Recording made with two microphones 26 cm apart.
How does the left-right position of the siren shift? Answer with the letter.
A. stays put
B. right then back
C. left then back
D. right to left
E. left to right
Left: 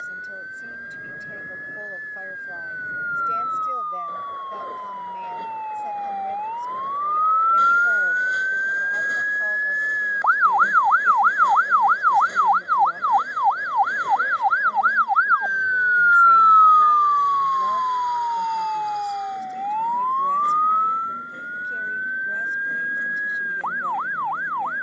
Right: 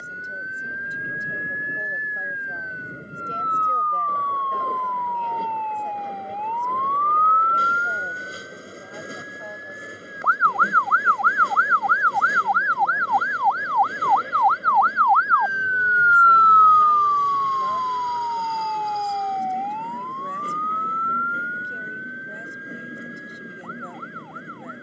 D.